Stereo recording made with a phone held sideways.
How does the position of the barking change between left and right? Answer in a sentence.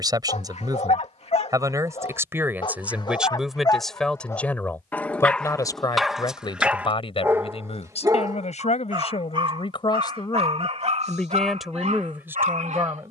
You can hear the barking move to the right.